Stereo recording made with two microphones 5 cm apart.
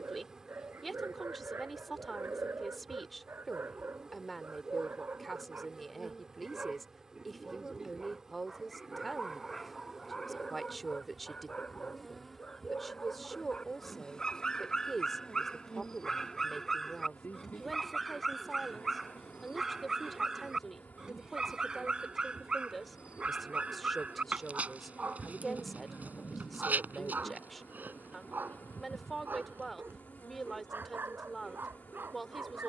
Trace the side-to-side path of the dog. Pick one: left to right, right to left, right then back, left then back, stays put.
left then back.